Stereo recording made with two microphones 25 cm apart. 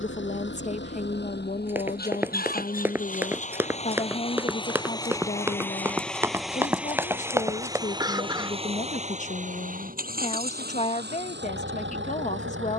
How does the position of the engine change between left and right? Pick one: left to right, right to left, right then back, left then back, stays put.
left to right.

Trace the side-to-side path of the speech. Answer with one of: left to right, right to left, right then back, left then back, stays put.
stays put.